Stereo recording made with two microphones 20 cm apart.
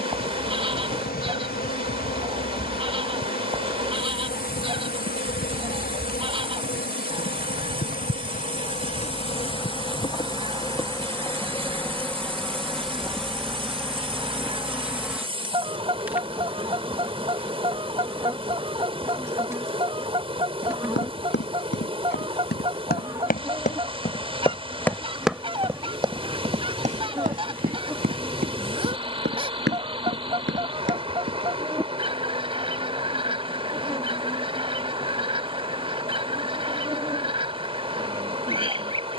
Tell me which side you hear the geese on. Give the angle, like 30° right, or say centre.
30° right.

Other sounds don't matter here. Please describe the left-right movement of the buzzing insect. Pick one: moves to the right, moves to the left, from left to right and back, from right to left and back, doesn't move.
moves to the right.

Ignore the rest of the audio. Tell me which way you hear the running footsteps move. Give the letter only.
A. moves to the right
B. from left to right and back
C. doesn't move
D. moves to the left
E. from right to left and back
A.